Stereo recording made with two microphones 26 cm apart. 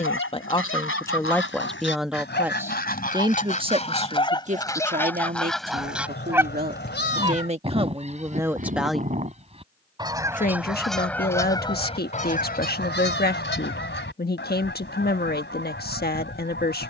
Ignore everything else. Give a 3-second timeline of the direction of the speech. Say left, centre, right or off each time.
centre, right, right, left, left, left.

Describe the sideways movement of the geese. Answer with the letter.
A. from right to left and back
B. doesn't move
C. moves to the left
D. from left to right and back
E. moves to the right
D.